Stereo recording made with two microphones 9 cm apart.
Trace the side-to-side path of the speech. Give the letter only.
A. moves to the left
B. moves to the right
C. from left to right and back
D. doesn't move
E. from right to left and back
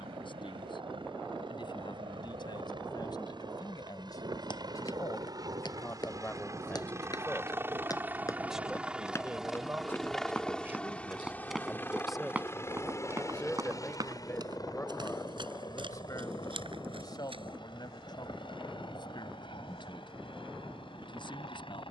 C.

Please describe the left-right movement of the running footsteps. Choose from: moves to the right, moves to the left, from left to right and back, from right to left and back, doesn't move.
moves to the right.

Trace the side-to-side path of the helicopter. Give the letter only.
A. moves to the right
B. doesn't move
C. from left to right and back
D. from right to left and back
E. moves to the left
E.